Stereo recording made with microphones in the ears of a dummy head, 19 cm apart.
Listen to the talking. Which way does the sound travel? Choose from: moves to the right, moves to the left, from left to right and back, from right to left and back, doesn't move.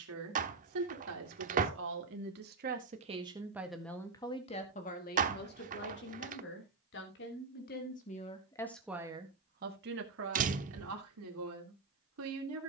from right to left and back.